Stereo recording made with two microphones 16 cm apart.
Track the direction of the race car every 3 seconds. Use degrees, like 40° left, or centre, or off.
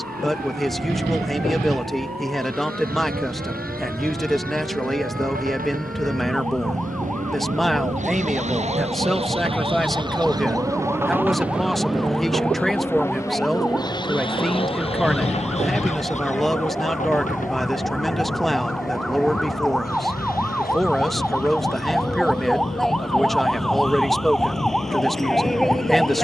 80° right, 70° right, 50° right, 20° right, 20° left, 50° left, 60° left, 60° left, off.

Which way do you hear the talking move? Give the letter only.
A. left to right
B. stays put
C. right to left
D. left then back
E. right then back
B.